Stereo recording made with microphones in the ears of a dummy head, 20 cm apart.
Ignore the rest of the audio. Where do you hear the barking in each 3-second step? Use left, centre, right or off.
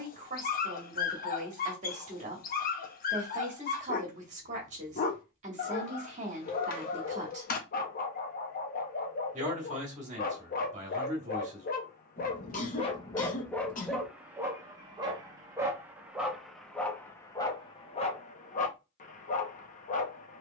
left, left, left, left, centre, centre, left.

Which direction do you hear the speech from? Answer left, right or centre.
right.